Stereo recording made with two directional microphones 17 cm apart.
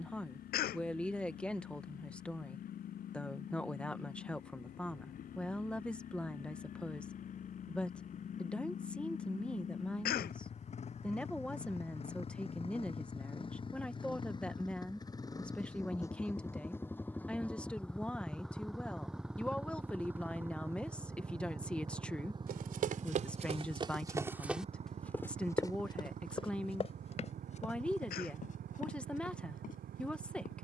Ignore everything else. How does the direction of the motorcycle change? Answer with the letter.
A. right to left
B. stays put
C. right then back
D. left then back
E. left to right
E.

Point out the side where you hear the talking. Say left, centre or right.
centre.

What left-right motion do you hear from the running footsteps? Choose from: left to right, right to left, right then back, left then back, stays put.
right to left.